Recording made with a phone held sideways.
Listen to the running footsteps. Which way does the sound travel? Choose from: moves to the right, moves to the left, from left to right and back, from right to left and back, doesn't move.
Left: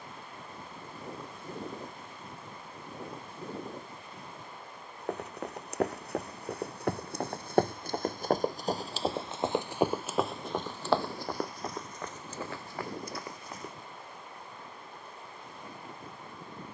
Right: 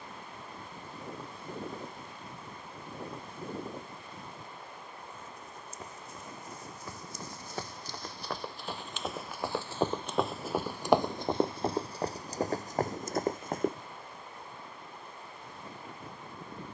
moves to the right.